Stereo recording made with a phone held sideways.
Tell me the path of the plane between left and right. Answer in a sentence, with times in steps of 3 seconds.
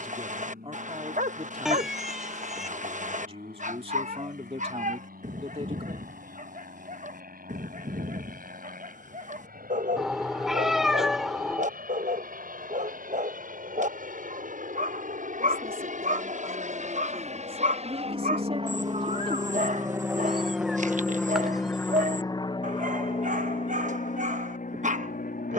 In this clip you hear the plane on the right from 0 s and on the left from 21 s.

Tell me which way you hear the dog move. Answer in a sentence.
You can hear the dog stay put.